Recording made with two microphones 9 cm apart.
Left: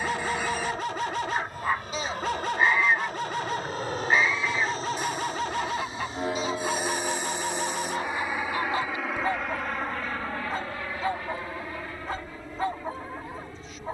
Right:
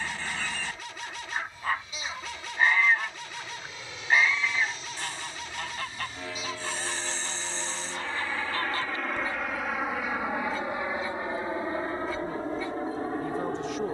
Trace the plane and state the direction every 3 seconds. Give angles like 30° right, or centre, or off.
60° left, 50° left, 20° left, 10° right, 40° right.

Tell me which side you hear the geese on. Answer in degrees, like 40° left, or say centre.
10° left.